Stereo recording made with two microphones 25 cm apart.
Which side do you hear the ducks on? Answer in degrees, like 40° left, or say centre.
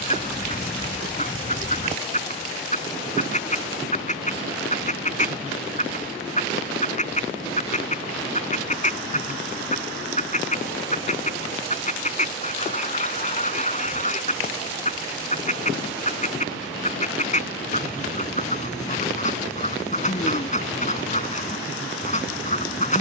30° left.